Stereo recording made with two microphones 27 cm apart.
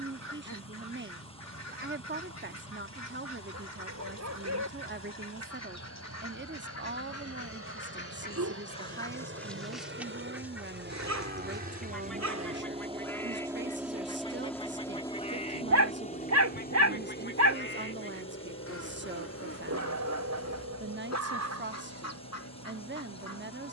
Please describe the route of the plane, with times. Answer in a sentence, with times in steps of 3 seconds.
You can hear the plane on the right from 0 s, in the centre from 12 s and on the left from 15 s.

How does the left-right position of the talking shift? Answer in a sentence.
In this clip you hear the talking stay put.